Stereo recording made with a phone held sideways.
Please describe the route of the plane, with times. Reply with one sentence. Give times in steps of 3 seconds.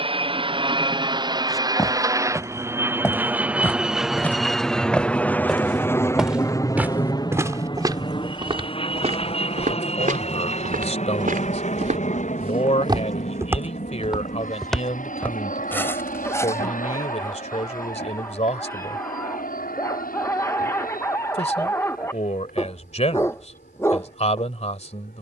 You can hear the plane on the right from 0 s, in the centre from 3 s and on the left from 6 s.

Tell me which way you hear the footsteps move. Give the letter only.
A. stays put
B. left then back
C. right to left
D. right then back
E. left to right
D.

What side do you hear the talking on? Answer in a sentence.
You can hear the talking on the left.